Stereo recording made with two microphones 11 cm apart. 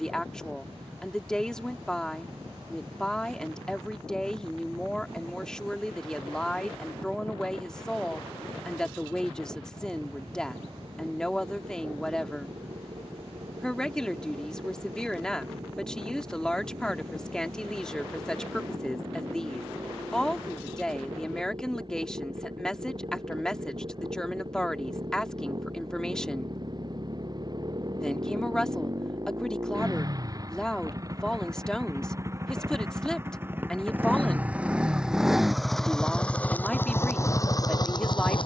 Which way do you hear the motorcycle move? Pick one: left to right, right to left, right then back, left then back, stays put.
right to left.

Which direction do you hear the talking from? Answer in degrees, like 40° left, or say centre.
10° left.